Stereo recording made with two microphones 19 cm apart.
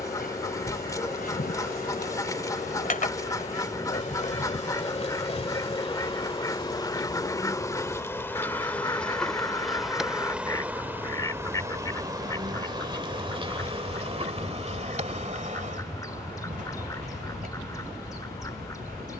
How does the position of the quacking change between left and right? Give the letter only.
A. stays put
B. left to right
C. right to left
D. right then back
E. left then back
A.